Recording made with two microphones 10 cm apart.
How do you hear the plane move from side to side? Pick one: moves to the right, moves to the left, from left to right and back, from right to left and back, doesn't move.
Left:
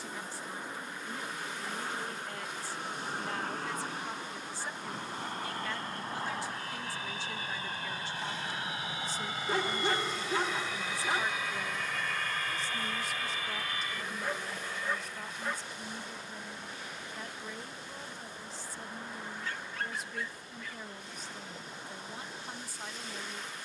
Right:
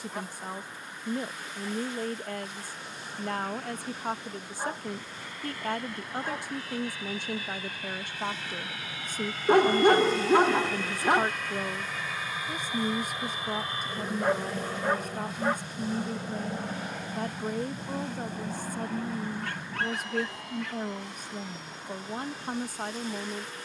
moves to the right.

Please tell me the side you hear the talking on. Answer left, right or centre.
right.